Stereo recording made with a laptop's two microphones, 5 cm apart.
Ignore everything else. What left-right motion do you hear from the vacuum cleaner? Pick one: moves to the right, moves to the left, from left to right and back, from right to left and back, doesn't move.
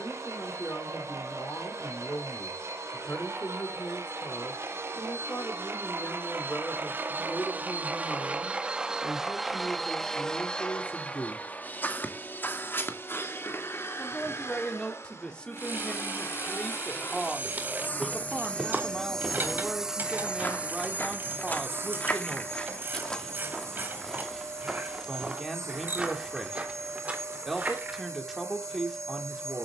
from right to left and back.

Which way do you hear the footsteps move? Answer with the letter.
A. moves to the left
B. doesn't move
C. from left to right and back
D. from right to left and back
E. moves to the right
D.